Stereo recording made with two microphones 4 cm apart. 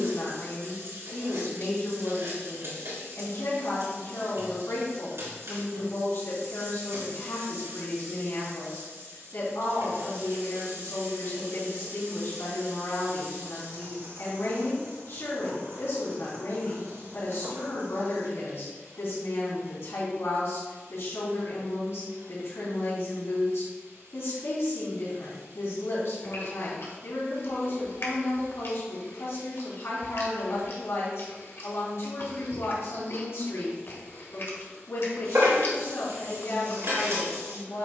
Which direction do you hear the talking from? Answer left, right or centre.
left.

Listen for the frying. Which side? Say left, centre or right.
right.